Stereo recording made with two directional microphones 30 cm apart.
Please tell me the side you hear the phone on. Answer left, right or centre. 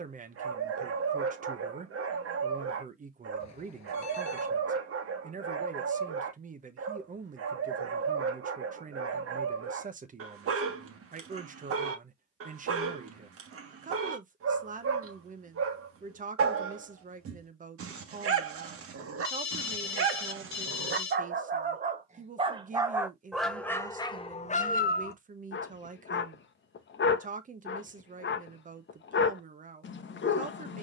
left.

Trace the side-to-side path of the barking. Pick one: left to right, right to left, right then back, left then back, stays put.
right to left.